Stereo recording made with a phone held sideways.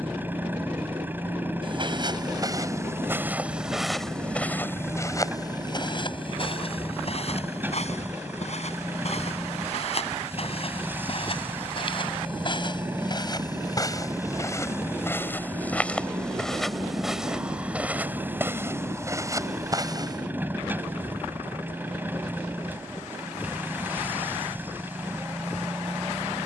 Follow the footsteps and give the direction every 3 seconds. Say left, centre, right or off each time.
right, centre, left, left, left, centre, right, off, off.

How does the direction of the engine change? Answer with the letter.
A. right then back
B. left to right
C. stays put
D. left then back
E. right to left
C.